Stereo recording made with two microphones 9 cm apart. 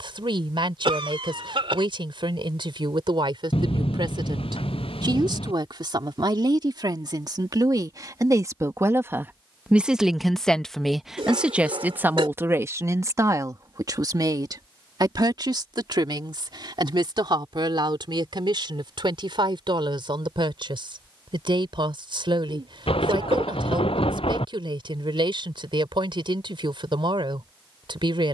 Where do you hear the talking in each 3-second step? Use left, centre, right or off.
right, right, right, centre, right, right, right, right, right, right.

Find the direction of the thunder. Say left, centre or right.
left.